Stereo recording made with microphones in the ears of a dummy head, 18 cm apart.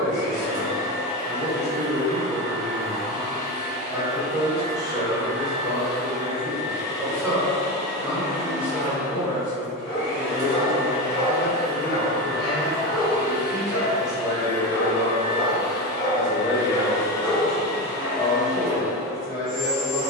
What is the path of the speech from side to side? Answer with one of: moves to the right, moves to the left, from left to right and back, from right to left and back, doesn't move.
moves to the left.